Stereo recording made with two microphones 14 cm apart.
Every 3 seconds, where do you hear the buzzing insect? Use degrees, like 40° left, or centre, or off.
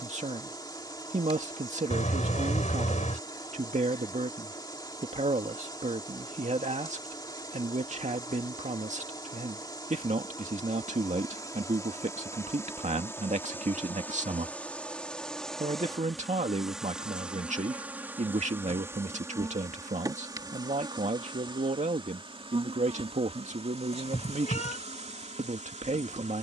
30° left, 30° left, 30° left, 30° left, 20° left, centre, 20° right, 40° right, 50° right.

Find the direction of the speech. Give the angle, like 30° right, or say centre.
60° right.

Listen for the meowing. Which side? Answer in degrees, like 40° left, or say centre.
60° left.